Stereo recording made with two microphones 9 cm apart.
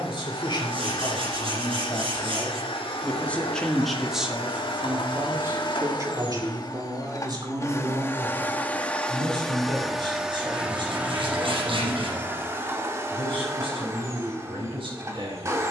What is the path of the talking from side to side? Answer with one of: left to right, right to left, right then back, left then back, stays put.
left to right.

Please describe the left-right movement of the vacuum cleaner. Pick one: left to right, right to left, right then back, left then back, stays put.
left to right.